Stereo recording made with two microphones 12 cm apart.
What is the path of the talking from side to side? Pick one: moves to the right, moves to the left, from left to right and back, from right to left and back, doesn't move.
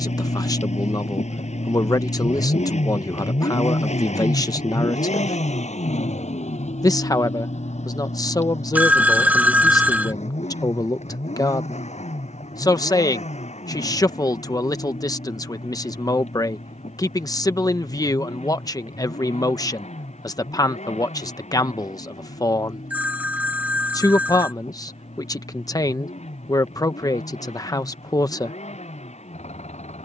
doesn't move.